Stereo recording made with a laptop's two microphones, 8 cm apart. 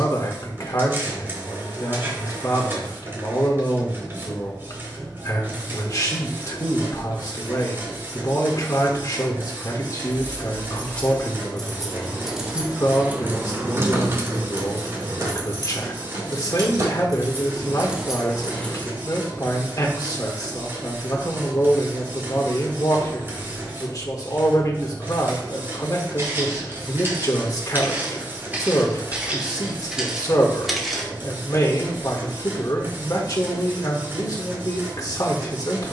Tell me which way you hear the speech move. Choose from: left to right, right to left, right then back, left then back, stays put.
stays put.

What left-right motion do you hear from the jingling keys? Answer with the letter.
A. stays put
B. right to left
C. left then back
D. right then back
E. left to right
D.